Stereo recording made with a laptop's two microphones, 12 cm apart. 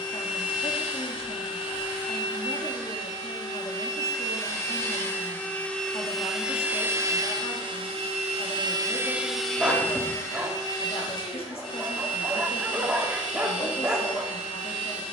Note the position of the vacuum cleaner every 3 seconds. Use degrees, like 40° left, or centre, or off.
40° left, 30° left, 30° right, 20° left, 40° left.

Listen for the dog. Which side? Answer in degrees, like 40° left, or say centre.
10° right.